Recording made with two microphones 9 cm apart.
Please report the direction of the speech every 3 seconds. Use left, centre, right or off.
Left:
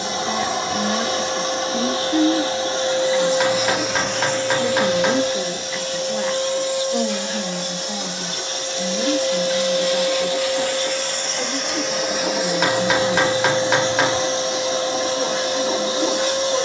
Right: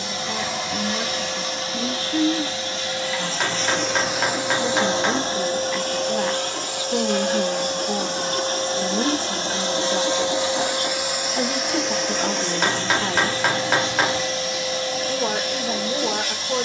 left, centre, right, right, right, right.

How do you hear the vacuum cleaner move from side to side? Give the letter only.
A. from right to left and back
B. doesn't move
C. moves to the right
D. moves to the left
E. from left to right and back
E.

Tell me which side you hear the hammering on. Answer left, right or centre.
centre.